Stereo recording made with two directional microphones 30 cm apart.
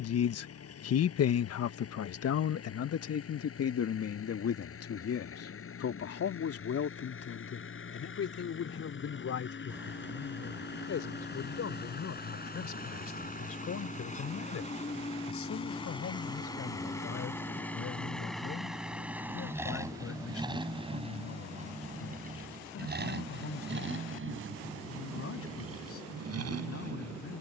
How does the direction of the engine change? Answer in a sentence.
In this clip you hear the engine move from left to right.